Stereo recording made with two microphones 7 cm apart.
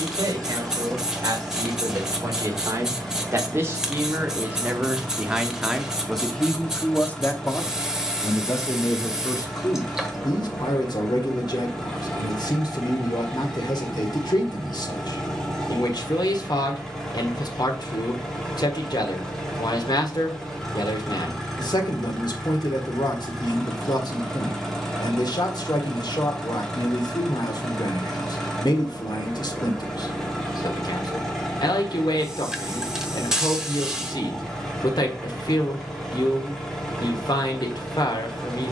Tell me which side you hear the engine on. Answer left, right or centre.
centre.